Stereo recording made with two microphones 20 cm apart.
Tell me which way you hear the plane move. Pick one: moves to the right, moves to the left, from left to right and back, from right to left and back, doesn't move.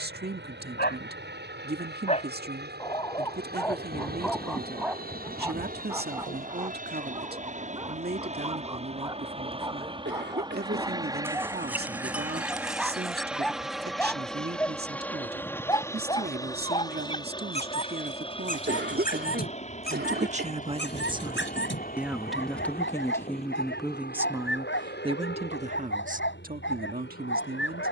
moves to the left.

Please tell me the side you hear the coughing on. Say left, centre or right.
right.